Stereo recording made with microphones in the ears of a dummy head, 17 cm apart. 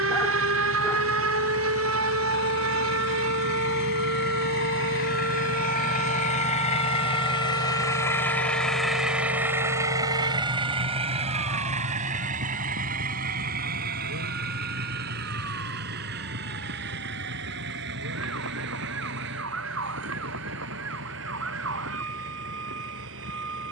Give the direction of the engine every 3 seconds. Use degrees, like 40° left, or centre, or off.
70° left, 60° left, 20° left, 30° right, 50° right, 60° right, 70° right, 70° right.